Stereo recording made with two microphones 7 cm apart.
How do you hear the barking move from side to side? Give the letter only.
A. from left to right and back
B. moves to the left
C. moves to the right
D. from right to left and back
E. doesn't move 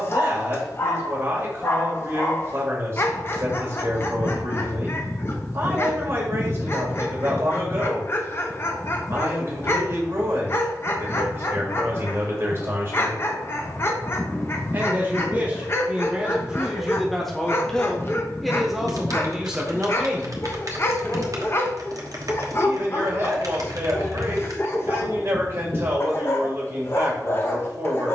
E.